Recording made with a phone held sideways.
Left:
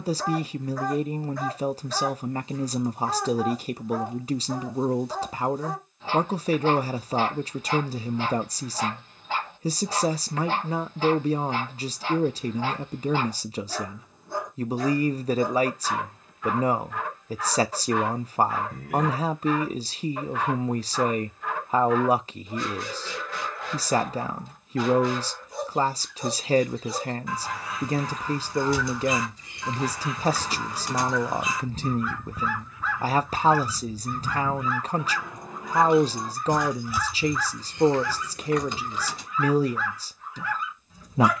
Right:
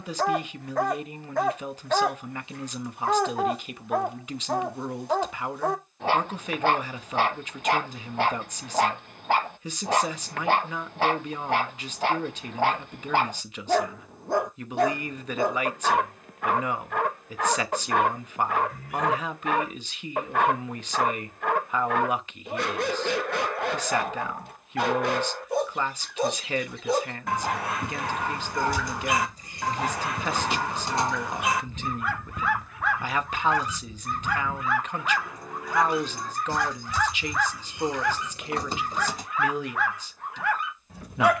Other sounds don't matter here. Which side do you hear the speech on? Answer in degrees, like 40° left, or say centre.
40° left.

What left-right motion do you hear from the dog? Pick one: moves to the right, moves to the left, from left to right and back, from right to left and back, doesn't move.
doesn't move.